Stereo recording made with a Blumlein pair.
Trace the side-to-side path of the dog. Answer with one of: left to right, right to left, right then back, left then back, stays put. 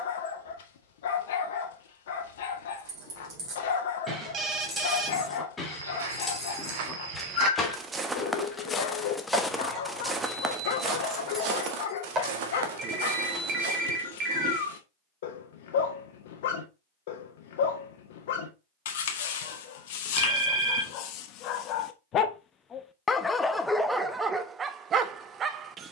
left to right.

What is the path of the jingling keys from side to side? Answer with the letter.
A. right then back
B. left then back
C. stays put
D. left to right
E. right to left
B.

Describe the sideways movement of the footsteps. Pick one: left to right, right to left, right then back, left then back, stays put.
left then back.